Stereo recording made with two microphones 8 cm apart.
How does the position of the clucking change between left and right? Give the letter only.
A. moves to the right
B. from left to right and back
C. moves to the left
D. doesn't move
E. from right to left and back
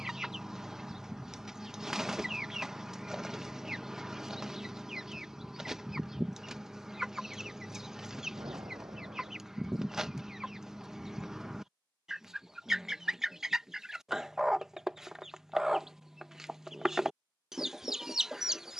D.